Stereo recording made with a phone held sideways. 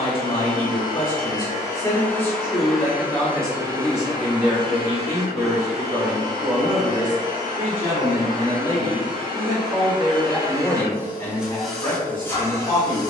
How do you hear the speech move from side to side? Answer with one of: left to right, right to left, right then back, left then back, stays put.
right then back.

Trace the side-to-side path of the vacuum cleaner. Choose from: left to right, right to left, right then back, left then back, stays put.
right then back.